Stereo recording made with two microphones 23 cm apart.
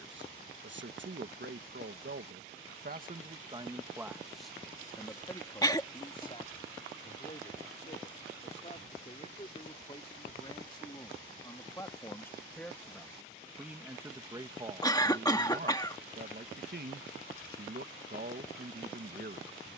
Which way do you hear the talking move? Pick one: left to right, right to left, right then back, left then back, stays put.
left then back.